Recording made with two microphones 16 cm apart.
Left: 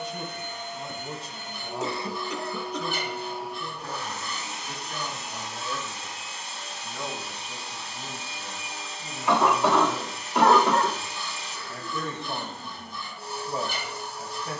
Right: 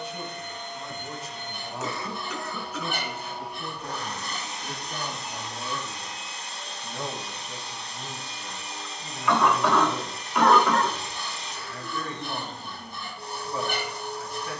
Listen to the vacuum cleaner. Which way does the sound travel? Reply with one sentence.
In this clip you hear the vacuum cleaner stay put.